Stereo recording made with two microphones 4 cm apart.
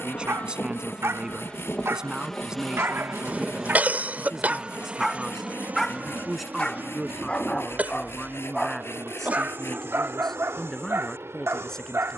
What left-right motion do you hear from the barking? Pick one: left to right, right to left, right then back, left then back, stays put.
left then back.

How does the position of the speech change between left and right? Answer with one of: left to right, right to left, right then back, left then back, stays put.
right to left.